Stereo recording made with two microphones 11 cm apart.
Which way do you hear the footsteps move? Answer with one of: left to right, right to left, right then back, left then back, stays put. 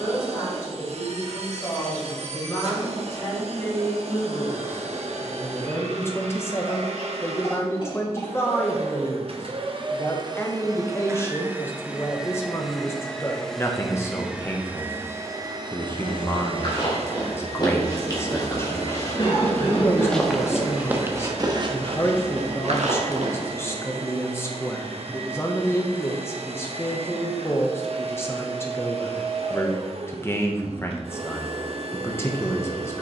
left to right.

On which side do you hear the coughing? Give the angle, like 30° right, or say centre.
50° left.